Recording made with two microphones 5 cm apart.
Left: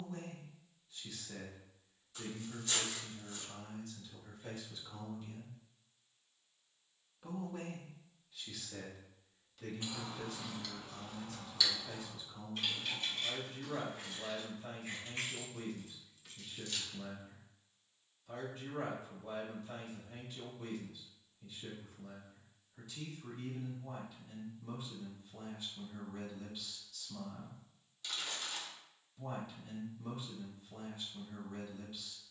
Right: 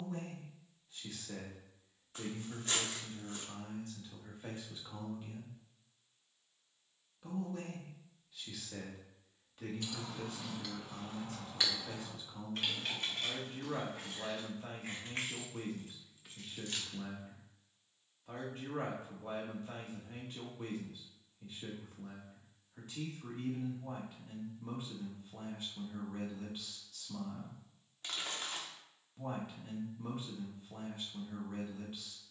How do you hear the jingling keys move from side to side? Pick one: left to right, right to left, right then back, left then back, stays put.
right then back.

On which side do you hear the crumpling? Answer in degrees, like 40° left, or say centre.
40° right.